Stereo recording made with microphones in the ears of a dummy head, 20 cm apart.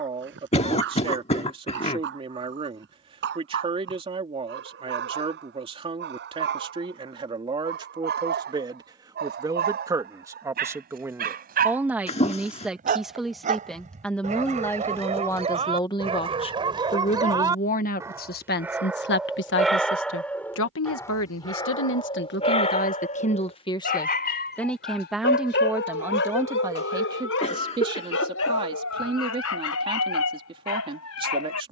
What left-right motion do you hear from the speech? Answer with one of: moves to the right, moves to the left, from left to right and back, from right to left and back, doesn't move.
from right to left and back.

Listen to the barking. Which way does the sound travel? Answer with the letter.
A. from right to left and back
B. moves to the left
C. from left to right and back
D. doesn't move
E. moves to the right
B.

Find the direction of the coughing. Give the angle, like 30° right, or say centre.
30° left.